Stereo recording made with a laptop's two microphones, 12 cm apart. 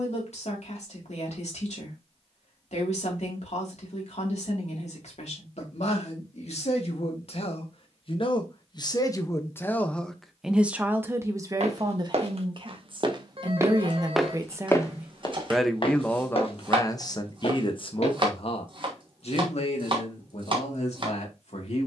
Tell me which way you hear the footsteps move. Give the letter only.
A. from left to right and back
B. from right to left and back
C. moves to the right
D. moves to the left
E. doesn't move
D.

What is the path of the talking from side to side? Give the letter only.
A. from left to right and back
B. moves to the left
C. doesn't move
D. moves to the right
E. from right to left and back
A.